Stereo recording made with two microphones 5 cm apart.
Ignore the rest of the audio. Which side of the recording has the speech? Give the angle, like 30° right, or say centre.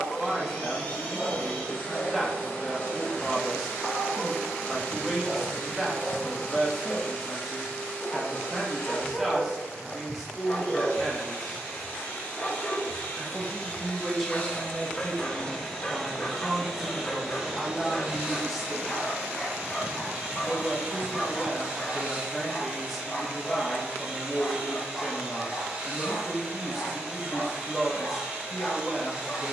centre.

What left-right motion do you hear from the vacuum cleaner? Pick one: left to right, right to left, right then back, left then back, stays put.
left to right.